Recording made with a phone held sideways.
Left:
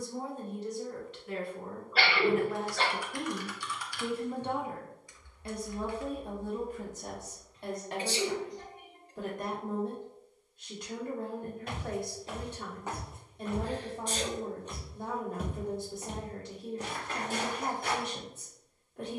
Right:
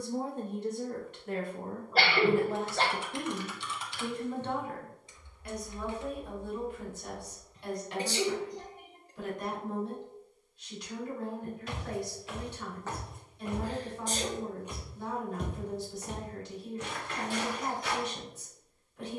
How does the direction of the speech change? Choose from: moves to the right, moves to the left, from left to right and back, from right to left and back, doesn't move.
moves to the left.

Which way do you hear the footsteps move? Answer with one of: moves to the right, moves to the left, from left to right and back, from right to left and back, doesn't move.
from left to right and back.